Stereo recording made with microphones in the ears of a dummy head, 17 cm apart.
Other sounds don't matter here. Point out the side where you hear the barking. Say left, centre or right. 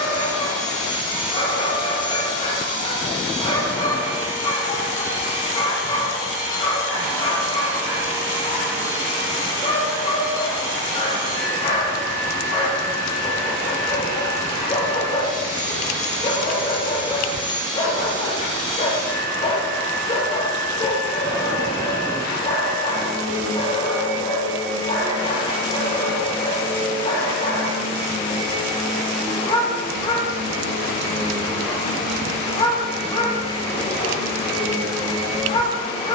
left.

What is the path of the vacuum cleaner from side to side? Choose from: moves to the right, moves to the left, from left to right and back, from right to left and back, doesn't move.
doesn't move.